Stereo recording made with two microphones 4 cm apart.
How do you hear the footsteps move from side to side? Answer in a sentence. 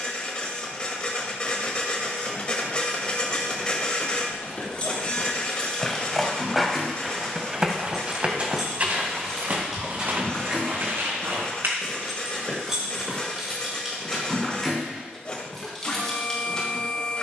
In this clip you hear the footsteps move to the right.